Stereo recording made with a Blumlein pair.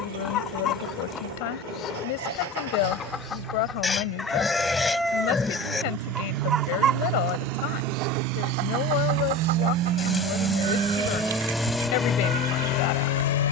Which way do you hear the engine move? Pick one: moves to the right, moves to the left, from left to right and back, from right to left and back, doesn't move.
moves to the left.